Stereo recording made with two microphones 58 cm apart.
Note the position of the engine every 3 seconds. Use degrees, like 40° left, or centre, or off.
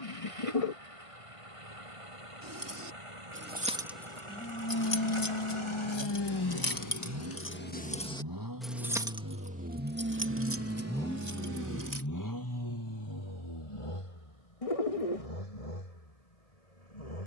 60° right, 50° right, 40° right, centre, 50° left, 70° left.